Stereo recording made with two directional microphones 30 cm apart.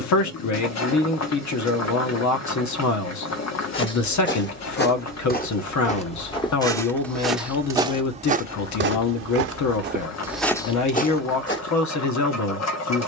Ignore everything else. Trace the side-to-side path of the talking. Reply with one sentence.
You can hear the talking stay in one place.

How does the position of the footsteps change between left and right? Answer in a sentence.
In this clip you hear the footsteps go right and come back.